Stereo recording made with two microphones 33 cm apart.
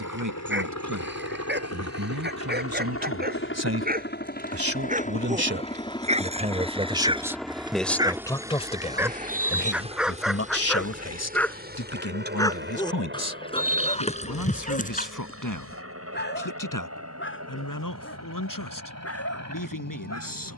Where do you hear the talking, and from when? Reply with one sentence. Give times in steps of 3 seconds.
You can hear the talking on the right from 0 s, in the centre from 6 s and on the left from 9 s.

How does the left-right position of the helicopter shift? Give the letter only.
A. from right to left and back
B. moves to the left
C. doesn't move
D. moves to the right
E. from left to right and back
D.